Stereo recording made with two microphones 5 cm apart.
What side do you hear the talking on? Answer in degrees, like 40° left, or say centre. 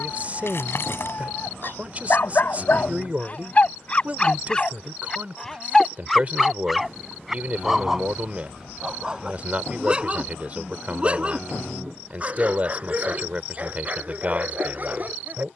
30° right.